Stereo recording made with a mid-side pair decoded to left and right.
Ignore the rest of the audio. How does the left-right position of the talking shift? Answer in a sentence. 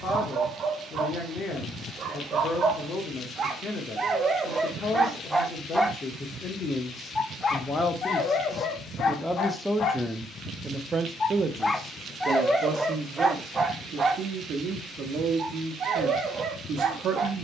In this clip you hear the talking go from the left side to the right.